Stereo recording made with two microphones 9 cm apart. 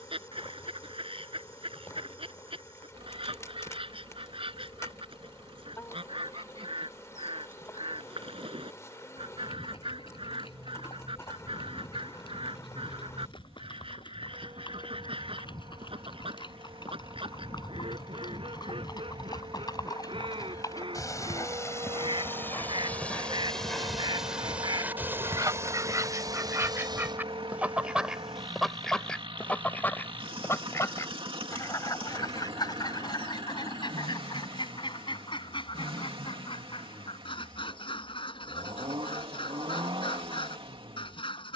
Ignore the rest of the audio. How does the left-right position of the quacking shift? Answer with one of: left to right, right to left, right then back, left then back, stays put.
right to left.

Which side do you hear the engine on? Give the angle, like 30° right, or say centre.
70° right.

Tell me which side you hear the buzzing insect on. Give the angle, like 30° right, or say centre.
30° left.